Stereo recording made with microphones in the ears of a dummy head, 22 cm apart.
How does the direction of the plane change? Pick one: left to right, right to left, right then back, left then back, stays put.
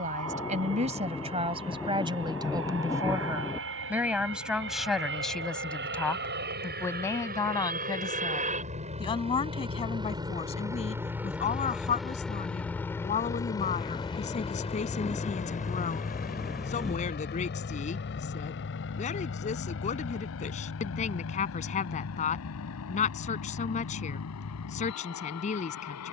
right to left.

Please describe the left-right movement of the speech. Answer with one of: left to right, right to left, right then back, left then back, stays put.
right to left.